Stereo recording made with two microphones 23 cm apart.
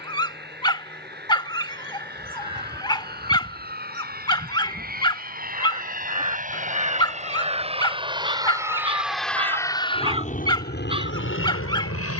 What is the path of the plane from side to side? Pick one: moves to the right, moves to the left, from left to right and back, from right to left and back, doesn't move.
moves to the left.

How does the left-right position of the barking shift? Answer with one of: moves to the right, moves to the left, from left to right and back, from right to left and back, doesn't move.
doesn't move.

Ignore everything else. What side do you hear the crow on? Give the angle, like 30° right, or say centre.
20° right.